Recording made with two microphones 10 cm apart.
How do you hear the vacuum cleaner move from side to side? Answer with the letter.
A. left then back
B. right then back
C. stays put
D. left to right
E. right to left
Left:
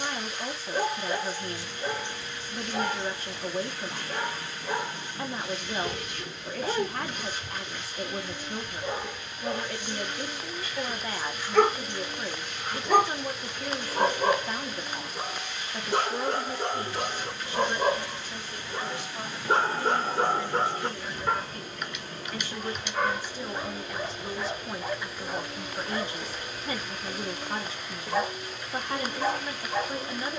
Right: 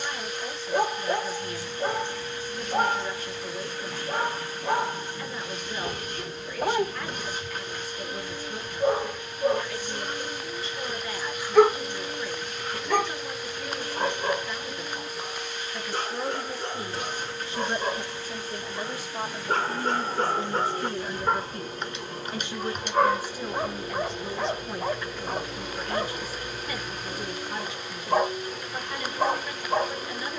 C.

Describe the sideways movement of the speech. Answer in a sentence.
In this clip you hear the speech move from left to right and back again.